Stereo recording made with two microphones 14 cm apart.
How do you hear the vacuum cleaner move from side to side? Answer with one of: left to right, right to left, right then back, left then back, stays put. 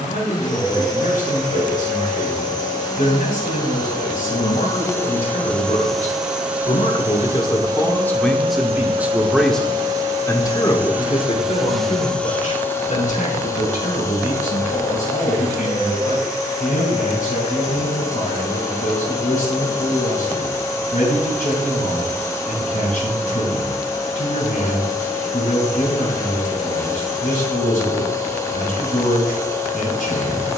right then back.